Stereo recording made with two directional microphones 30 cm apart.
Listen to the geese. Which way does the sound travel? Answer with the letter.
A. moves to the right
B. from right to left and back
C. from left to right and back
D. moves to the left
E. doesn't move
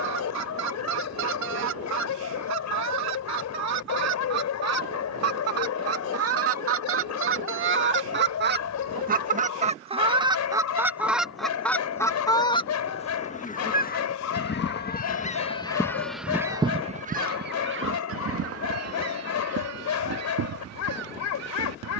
B.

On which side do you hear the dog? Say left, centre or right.
left.